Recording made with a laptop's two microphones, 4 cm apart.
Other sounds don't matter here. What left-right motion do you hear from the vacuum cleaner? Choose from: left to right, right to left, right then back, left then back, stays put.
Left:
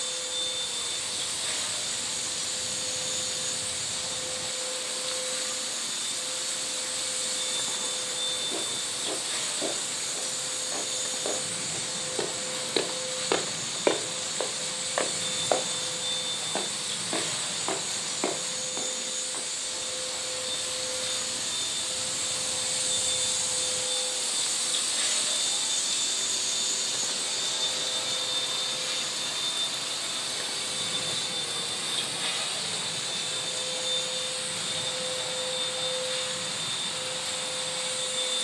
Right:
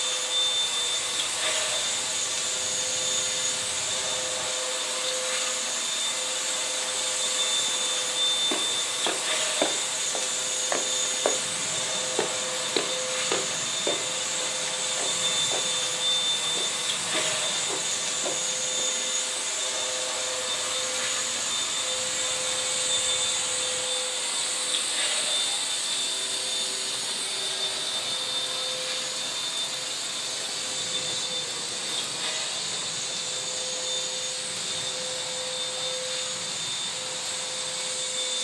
right to left.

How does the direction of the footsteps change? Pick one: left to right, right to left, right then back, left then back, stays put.
right to left.